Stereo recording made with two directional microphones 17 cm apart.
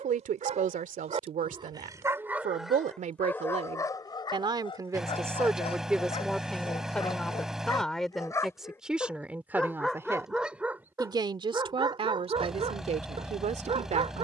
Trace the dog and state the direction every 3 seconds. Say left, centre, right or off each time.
right, left, left, centre, right.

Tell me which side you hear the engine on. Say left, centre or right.
centre.